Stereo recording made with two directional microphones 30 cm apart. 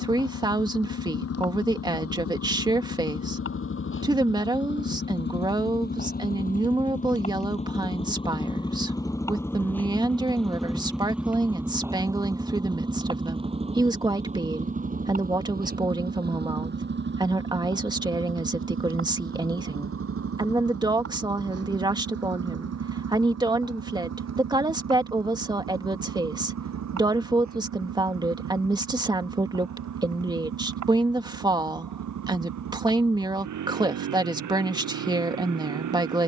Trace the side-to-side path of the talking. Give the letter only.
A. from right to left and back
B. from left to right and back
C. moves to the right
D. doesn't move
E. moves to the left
D.